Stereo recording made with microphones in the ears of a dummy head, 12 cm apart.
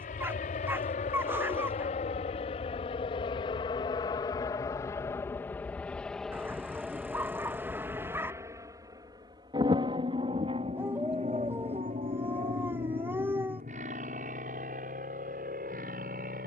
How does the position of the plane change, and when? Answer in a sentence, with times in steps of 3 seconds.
In this clip you hear the plane on the left from 0 s, in the centre from 6 s and on the right from 9 s.